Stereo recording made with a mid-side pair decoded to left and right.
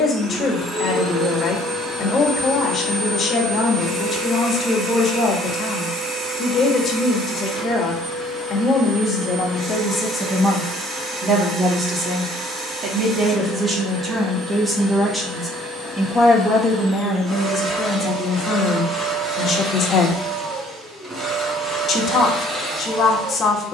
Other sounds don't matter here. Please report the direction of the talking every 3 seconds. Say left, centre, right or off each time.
left, left, left, centre, right, centre, left, left.